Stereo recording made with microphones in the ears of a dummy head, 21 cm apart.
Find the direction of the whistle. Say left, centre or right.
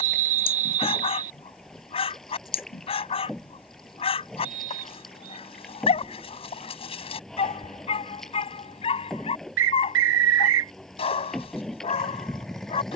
right.